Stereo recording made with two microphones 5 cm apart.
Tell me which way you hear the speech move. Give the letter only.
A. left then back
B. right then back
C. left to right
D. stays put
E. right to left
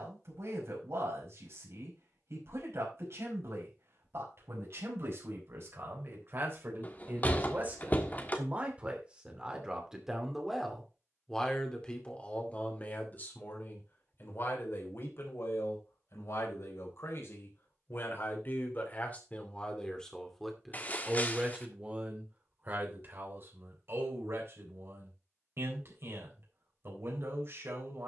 A.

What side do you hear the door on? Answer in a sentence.
In this clip you hear the door on the left.